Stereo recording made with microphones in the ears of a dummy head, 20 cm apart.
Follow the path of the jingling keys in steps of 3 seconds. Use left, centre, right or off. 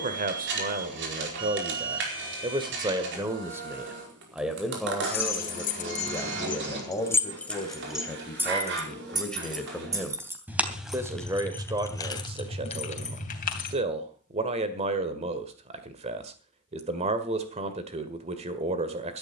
off, left, centre, centre, left, off, off.